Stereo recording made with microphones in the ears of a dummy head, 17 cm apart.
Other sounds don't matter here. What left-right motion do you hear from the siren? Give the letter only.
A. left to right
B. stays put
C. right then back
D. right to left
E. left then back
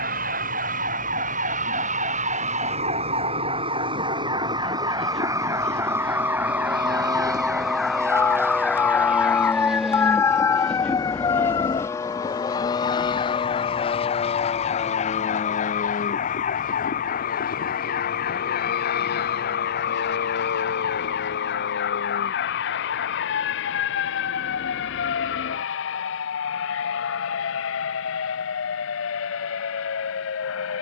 D.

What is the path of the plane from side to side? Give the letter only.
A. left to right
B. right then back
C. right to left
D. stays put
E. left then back
C.